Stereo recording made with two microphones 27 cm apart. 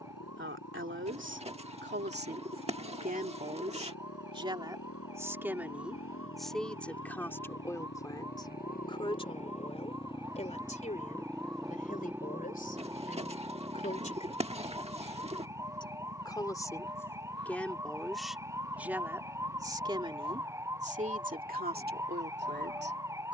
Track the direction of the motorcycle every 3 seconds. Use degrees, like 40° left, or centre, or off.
80° left, 70° left, 50° left, 10° left, 20° right, 40° right, 50° right, 60° right.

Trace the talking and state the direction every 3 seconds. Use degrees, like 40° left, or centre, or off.
50° right, 20° right, 10° left, 30° left, 30° left, 10° left, 10° right, 40° right.